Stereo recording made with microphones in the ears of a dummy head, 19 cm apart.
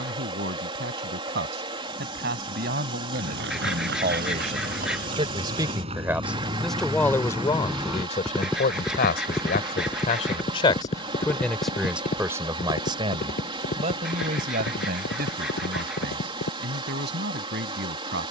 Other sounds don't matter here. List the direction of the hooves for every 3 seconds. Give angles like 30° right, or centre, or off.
off, 40° right, 10° right, 20° left, 40° left, 50° left.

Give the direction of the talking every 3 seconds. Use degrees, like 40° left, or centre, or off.
50° right, 30° right, 20° left, 30° left, 30° right, 50° right.